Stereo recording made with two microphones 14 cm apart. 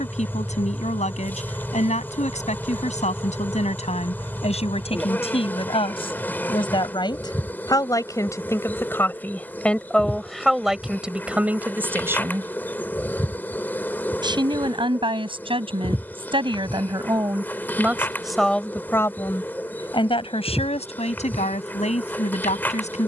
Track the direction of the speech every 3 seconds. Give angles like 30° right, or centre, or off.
60° left, 50° left, 30° left, centre, 30° right, 30° right, 30° left, 60° left.